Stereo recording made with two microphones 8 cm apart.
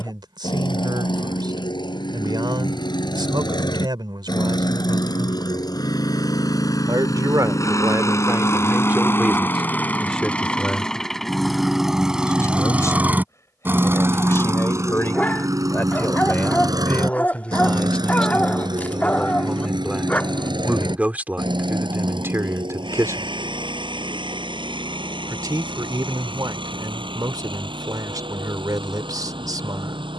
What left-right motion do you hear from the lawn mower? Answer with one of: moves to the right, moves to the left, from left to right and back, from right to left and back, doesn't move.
moves to the right.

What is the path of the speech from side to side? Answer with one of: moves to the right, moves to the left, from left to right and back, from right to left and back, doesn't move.
from right to left and back.